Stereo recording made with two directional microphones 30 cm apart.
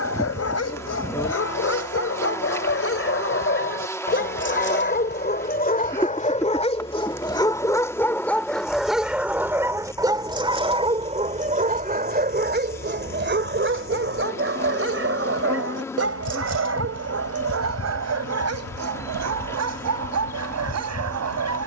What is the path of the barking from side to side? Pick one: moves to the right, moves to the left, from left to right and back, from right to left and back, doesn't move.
moves to the right.